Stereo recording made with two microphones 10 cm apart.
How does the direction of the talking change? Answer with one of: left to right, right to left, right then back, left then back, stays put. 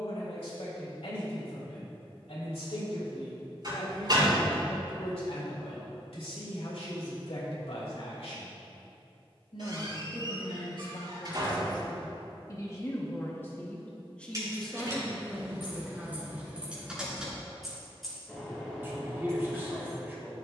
left to right.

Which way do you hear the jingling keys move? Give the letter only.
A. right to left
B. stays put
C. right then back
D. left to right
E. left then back
A.